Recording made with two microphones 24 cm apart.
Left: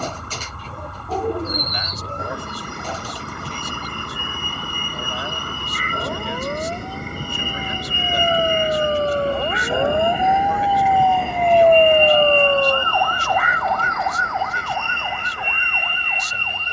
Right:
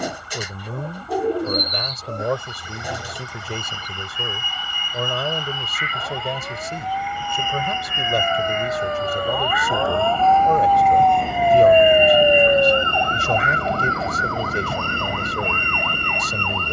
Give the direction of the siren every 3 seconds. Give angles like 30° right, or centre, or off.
70° left, 60° left, 50° left, 20° left, 30° right, 60° right.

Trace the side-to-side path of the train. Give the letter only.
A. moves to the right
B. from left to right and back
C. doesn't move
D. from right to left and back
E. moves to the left
A.